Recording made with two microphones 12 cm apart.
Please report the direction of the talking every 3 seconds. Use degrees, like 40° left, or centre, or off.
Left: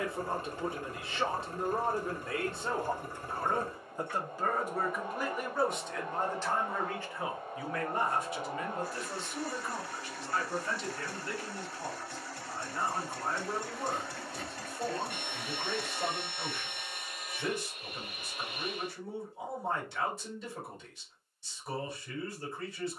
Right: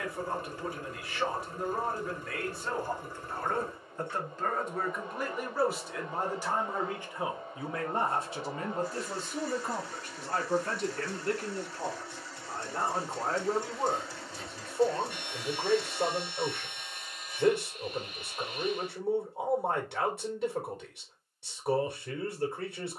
20° left, 10° left, 20° right, 50° right, 60° right, 60° right, 60° right, 60° right.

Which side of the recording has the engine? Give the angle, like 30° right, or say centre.
60° left.